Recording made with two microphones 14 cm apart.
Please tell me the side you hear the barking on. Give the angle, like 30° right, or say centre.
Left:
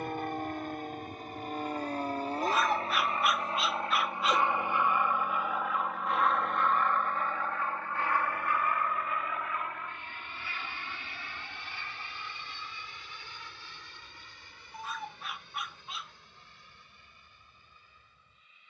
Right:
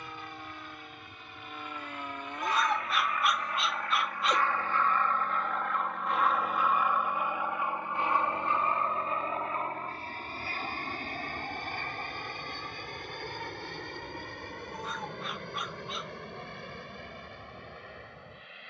centre.